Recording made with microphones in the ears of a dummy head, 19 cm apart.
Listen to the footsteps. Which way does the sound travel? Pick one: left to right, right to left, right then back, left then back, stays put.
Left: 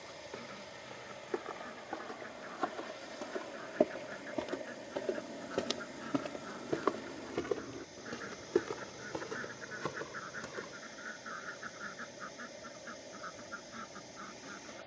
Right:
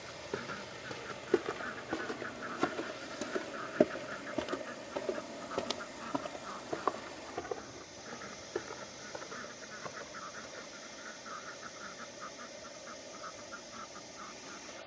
right to left.